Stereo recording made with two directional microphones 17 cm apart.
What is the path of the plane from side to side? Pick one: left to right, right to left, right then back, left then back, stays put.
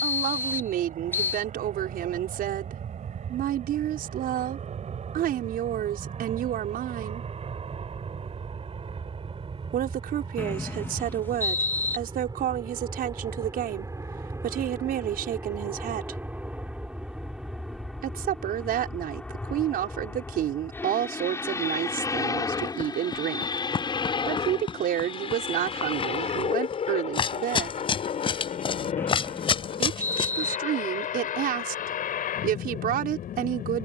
right to left.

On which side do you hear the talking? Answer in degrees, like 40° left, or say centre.
70° right.